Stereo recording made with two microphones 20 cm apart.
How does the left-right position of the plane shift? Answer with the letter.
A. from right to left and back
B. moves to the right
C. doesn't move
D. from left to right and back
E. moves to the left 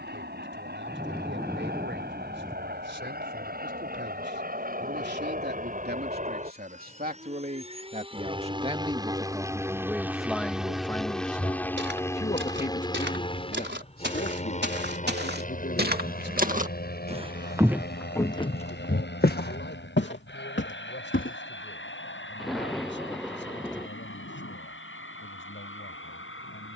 E.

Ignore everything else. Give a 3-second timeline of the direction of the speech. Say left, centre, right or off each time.
right, right, right, centre, left, left, left, left, left.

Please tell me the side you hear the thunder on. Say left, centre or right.
centre.